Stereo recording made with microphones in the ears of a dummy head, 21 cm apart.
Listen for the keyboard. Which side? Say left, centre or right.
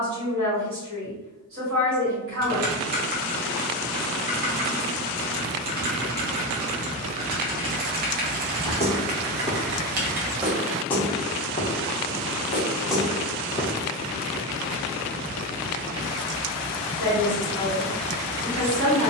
right.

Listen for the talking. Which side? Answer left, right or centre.
right.